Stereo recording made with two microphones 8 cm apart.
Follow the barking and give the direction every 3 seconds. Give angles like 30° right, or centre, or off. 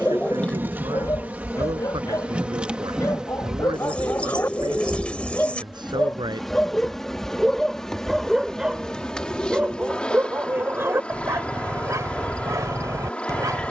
40° left, 30° left, centre, 30° right, 50° right.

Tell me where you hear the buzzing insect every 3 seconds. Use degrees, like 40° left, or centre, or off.
20° right, 10° right, 10° left, 10° left, 20° left.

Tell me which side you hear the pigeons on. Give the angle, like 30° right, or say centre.
20° left.